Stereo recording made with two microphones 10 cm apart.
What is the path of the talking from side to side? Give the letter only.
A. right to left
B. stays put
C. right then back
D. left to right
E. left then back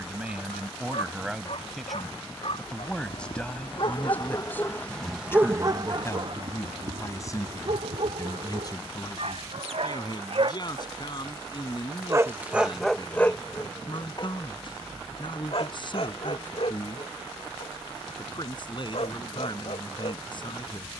A.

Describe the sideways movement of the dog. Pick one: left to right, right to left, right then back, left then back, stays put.
right then back.